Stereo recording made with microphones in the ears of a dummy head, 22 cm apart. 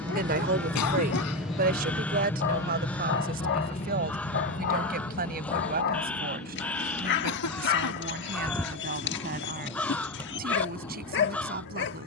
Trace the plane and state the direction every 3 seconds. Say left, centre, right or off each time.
centre, left, left, left.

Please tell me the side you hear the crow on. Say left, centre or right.
centre.